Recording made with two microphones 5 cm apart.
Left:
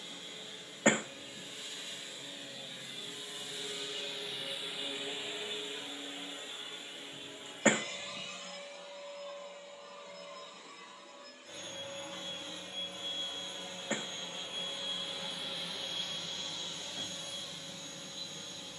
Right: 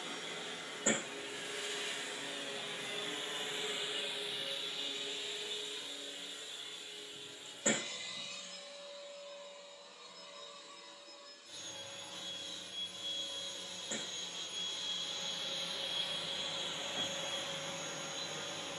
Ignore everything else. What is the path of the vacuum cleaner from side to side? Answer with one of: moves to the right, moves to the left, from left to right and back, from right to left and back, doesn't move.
from right to left and back.